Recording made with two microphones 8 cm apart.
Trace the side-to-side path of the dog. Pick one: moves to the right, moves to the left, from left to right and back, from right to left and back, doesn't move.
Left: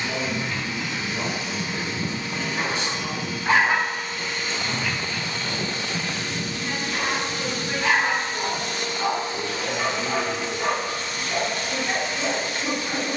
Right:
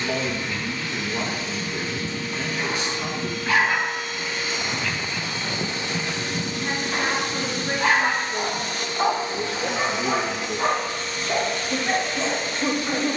moves to the right.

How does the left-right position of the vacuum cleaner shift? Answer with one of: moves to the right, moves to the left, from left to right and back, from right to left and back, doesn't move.
from left to right and back.